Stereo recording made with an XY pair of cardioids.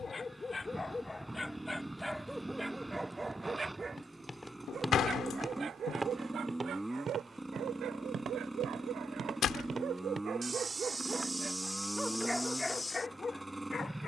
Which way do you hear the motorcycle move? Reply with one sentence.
In this clip you hear the motorcycle stay put.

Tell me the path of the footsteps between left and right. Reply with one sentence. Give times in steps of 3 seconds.
In this clip you hear the footsteps not at all from 0 s, in the centre from 3 s, on the right from 6 s and in the centre from 12 s.